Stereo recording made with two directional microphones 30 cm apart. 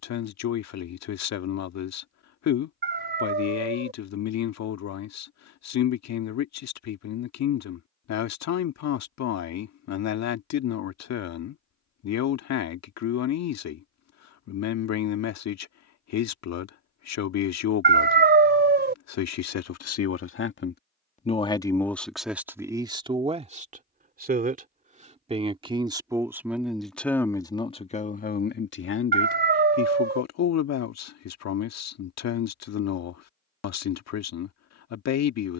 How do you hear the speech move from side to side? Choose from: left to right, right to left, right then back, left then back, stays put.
right then back.